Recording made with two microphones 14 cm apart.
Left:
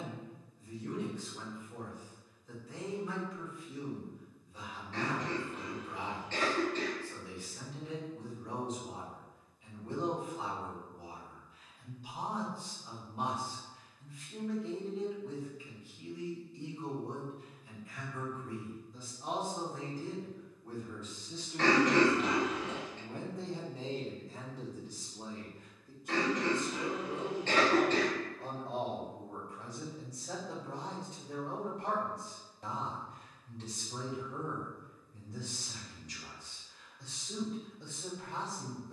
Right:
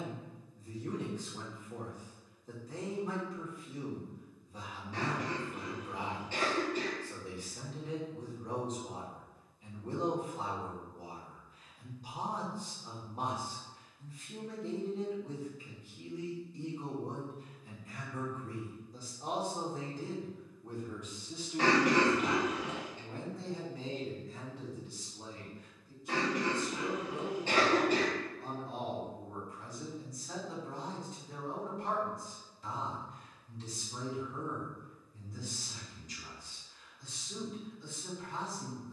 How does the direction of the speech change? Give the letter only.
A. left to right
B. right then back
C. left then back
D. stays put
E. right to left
E.